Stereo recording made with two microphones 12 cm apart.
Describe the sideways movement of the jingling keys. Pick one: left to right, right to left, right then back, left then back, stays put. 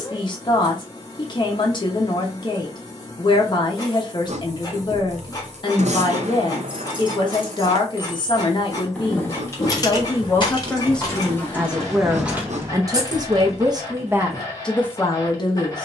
left then back.